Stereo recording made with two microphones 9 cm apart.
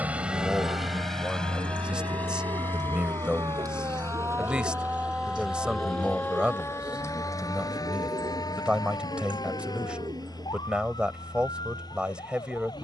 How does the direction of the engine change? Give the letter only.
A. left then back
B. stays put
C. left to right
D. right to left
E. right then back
D.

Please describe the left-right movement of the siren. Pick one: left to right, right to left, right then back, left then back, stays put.
right to left.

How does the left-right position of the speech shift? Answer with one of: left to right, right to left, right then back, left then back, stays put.
stays put.